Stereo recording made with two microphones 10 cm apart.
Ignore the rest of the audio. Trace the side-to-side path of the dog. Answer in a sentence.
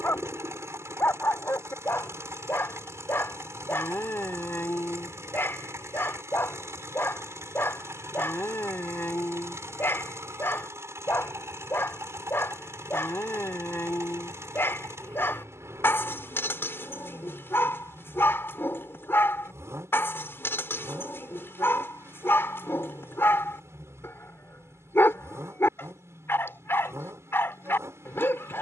In this clip you hear the dog stay put.